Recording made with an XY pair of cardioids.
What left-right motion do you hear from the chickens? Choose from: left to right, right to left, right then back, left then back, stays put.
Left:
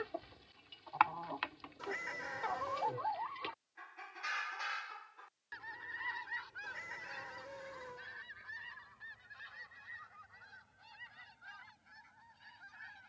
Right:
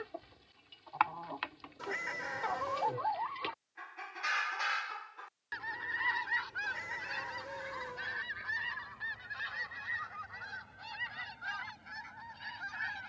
left to right.